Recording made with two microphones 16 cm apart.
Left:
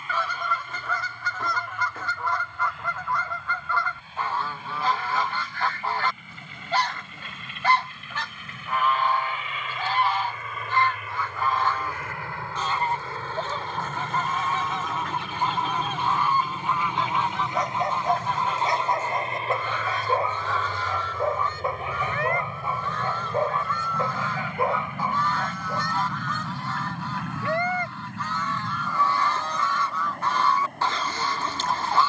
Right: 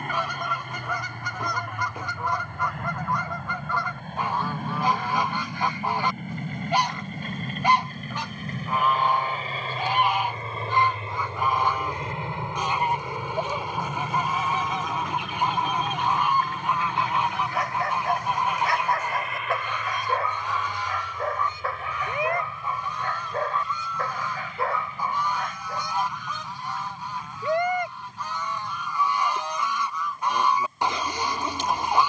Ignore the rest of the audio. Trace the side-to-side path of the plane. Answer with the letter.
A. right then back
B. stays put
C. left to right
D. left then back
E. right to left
E.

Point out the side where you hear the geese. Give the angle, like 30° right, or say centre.
10° right.